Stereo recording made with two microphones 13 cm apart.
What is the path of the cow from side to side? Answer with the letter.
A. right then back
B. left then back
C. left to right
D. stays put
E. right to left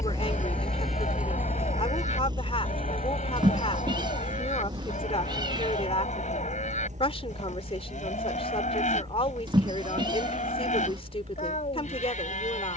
D.